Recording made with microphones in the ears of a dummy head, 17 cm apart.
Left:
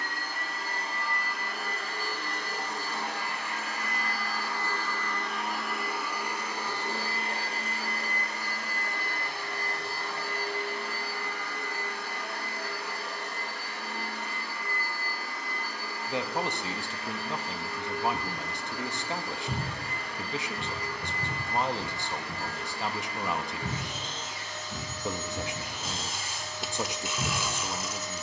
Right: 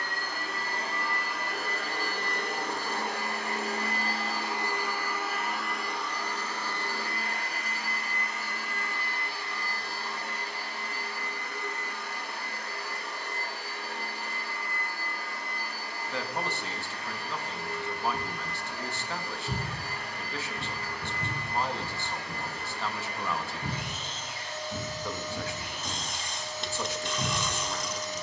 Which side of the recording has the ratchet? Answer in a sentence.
You can hear the ratchet in the centre.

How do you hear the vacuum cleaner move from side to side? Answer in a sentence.
In this clip you hear the vacuum cleaner go from the right side to the left.